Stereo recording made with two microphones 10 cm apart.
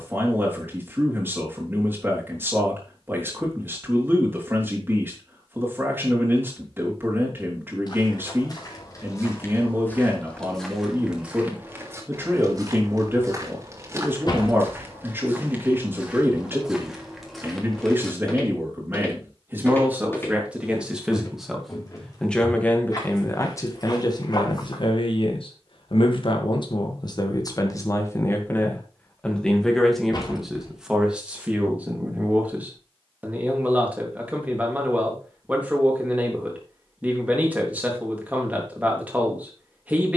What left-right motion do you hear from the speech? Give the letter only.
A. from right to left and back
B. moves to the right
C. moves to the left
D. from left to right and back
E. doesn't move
A.